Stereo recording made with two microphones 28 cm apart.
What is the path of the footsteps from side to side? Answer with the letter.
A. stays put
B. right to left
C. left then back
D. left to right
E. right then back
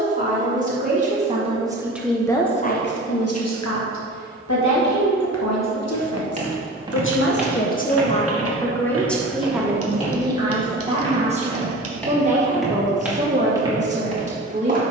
C.